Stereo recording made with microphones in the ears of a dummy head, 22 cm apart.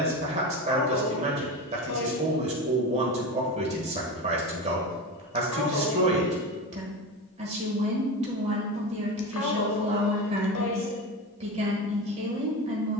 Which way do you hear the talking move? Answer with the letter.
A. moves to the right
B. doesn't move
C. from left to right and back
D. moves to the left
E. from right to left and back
B.